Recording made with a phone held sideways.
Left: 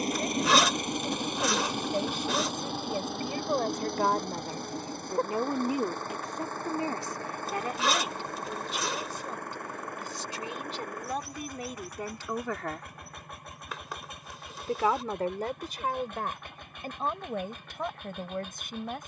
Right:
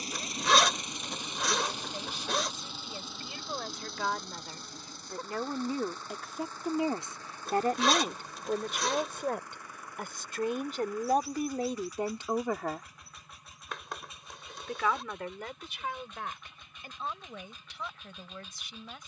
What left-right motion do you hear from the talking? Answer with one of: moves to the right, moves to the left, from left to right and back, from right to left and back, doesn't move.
from left to right and back.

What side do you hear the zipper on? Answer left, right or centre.
centre.